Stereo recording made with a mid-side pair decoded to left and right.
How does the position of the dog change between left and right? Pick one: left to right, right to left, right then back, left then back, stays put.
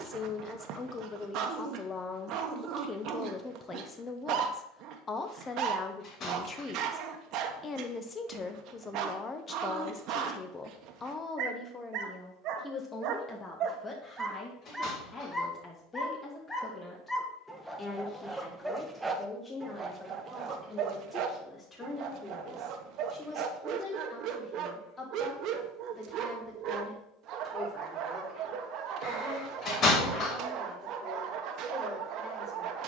left then back.